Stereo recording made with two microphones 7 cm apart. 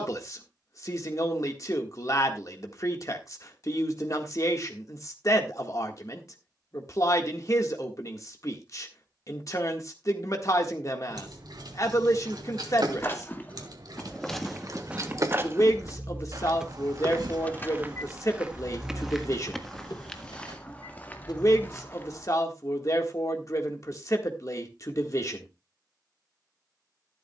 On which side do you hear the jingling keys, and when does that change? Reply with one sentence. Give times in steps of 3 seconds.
In this clip you hear the jingling keys not at all from 0 s, on the right from 9 s, in the centre from 15 s, on the left from 18 s and not at all from 24 s.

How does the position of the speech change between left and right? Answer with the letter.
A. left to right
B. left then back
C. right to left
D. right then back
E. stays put
E.